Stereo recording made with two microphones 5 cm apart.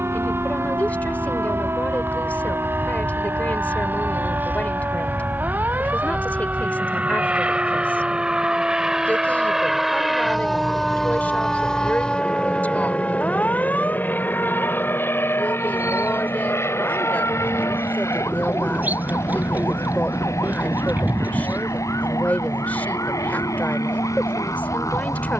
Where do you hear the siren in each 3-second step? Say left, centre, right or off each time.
right, right, right, centre, left, left, left, left, left.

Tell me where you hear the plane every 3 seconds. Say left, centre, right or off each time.
right, right, right, centre, left, left, left, left, left.